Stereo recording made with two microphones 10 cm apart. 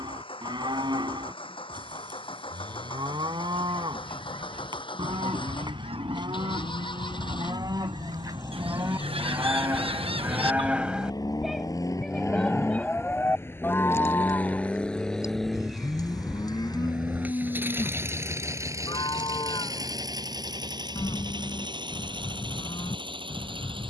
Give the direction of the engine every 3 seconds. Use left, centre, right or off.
left, left, left, left, left, centre, right, right.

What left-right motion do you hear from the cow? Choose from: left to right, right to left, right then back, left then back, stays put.
right to left.